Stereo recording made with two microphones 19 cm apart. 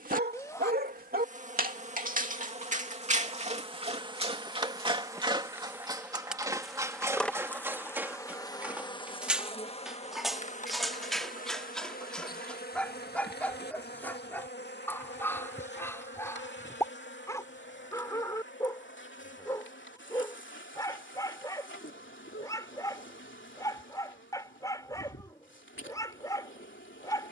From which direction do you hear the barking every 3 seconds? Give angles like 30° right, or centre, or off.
50° right, 30° right, 10° right, centre, 10° left, 10° left, 20° left, 20° left, 20° left.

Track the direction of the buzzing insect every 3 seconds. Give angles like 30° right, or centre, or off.
40° right, 20° right, 10° left, 40° left, 60° left, 70° left, 70° left, 80° left, 80° left.